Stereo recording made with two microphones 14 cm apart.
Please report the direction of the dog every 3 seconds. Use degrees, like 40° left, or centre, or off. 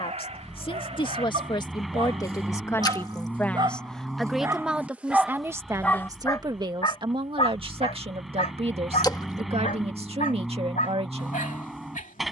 50° right, 20° right, 40° left, 80° left.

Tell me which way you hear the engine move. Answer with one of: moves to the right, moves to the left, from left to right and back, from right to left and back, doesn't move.
doesn't move.